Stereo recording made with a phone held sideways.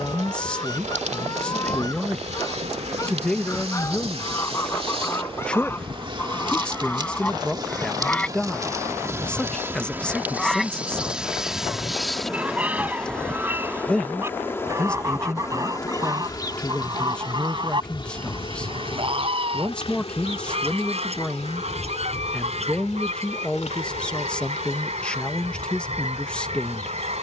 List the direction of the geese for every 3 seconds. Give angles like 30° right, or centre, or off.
30° left, 20° left, 10° left, centre, 10° right, 30° right, 40° right, 50° right, 50° right.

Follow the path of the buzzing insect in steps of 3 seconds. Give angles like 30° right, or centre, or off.
50° right, 40° right, 30° right, 10° right, 10° left, 30° left, 40° left, 50° left, 60° left.